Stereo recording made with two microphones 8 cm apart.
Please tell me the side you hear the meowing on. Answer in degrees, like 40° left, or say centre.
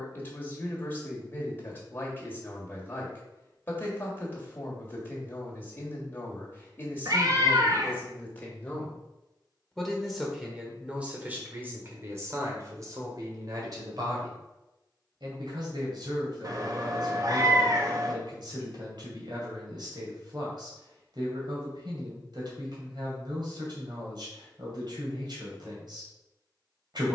50° right.